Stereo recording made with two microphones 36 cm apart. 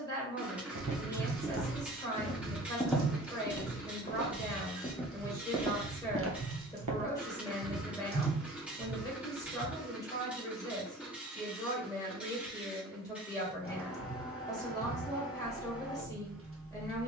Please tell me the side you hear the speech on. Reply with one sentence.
You can hear the speech in the centre.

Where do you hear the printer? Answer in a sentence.
In this clip you hear the printer in the centre.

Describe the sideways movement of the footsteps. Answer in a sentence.
You can hear the footsteps go left and come back.